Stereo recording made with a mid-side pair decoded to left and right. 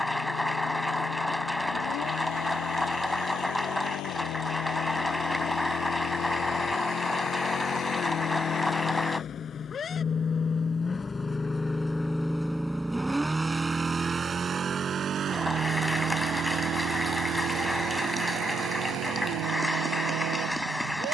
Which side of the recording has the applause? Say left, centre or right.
centre.